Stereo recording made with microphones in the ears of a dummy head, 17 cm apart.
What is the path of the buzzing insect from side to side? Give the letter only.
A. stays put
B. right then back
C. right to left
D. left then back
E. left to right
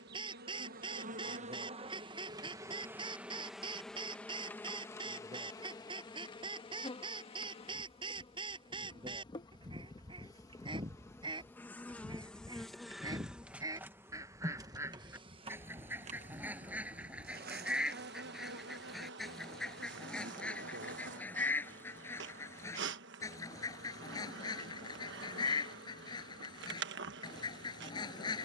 D.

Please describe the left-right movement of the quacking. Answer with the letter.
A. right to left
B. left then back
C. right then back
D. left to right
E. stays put
A.